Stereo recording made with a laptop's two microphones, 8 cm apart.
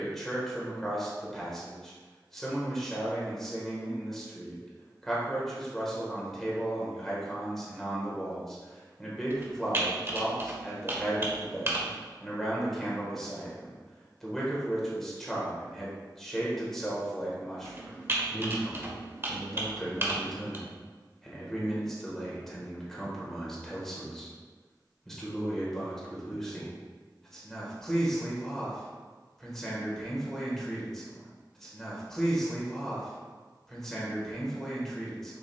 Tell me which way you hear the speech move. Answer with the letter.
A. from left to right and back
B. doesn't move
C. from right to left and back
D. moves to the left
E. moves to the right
B.